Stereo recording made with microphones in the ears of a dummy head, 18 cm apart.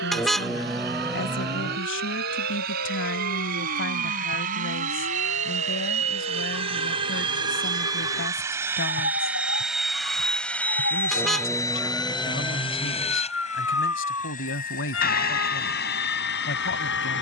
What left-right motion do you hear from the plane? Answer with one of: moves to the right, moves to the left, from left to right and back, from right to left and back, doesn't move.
moves to the left.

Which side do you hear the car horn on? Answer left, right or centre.
centre.